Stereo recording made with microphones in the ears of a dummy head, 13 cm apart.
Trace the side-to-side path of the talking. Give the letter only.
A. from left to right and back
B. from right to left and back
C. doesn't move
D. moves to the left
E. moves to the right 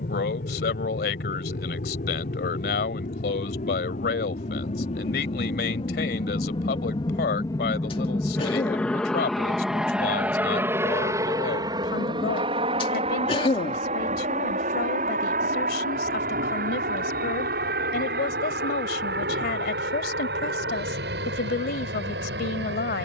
C.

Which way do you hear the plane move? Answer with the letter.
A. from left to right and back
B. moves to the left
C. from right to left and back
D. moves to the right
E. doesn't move
D.